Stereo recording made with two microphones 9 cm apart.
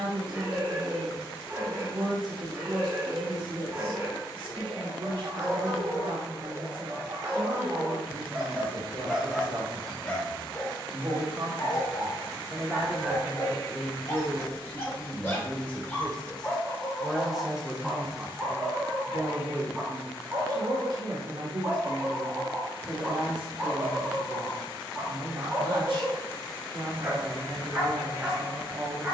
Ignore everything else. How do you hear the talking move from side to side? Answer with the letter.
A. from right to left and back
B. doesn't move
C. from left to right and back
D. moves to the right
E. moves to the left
A.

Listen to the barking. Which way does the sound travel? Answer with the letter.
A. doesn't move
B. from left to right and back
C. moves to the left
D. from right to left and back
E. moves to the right
D.